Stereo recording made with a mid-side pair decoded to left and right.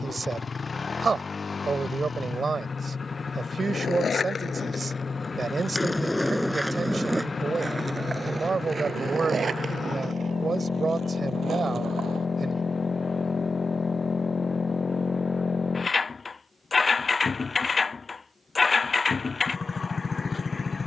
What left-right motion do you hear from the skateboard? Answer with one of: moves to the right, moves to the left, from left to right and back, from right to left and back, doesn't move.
moves to the right.